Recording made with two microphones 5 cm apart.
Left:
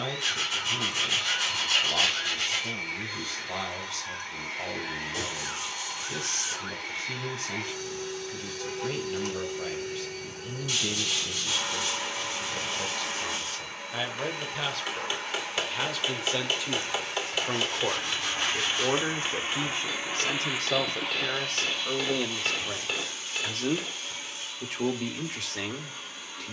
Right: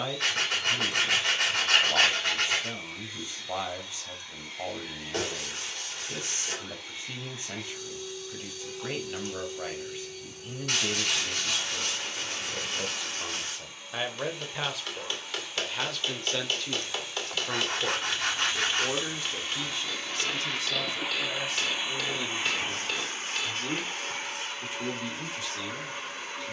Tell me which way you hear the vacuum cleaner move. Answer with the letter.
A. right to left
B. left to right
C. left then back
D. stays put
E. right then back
B.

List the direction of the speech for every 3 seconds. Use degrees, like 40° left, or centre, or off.
20° right, 20° right, 20° right, 20° right, 10° right, 10° left, 40° left, 60° left, 70° left.